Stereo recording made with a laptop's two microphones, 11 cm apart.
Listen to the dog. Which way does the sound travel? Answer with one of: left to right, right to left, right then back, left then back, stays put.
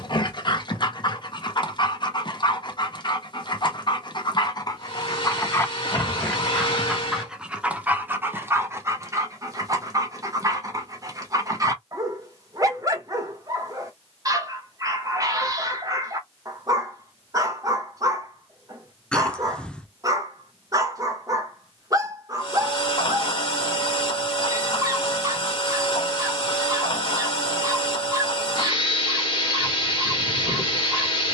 left to right.